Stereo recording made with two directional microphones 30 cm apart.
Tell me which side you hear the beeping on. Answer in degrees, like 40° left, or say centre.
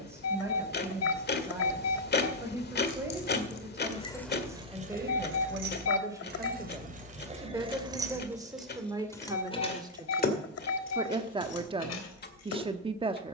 50° left.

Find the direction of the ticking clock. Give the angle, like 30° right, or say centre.
30° left.